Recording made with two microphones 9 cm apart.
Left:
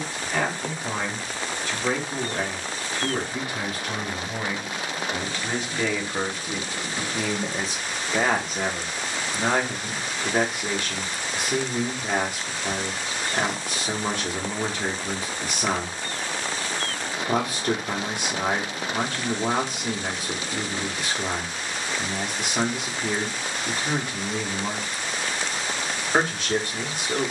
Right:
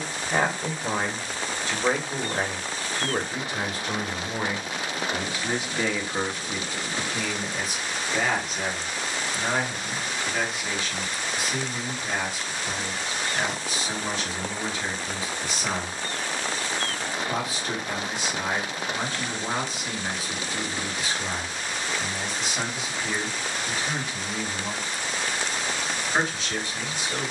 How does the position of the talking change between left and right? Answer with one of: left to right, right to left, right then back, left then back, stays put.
right to left.